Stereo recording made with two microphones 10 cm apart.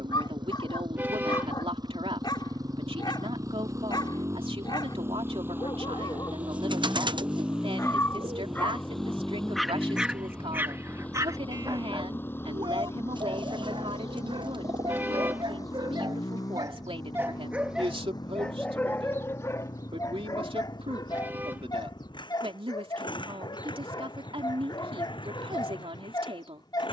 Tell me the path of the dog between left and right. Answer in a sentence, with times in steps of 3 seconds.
You can hear the dog on the left from 0 s, on the right from 9 s and on the left from 18 s.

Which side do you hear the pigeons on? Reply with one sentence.
In this clip you hear the pigeons on the right.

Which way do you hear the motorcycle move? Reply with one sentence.
In this clip you hear the motorcycle move from right to left.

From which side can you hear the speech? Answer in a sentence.
In this clip you hear the speech on the right.